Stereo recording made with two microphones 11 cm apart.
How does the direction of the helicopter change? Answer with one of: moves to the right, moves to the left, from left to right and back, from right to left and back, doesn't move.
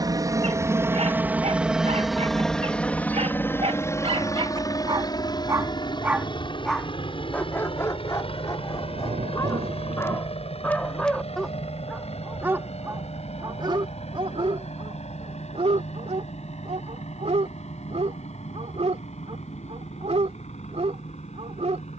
moves to the left.